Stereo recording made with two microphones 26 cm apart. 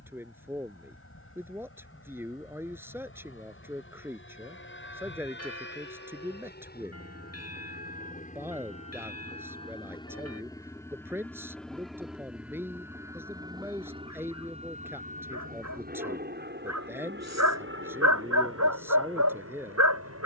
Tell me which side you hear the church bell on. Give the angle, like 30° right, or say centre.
60° left.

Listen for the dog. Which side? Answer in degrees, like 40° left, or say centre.
80° right.